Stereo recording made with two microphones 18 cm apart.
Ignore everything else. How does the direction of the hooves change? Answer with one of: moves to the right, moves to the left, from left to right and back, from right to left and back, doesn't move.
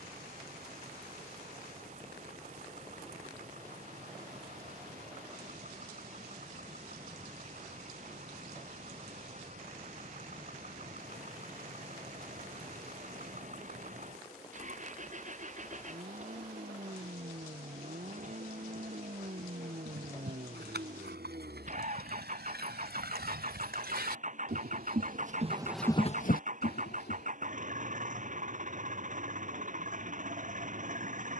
moves to the left.